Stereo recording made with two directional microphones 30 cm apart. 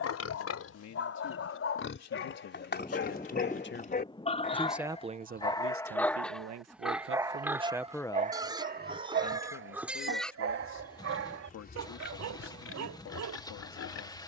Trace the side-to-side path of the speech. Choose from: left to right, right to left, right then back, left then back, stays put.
right then back.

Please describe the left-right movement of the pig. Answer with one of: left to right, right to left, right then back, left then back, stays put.
right then back.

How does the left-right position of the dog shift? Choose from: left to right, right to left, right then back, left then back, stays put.
left to right.